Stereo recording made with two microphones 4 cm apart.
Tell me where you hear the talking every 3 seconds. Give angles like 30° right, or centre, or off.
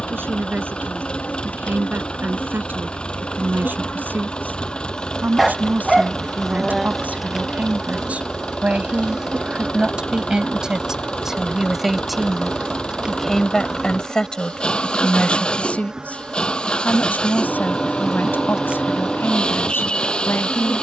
50° right, 50° right, 40° right, 20° right, 10° left, 40° left, 60° left.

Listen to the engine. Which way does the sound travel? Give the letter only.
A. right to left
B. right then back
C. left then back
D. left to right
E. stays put
E.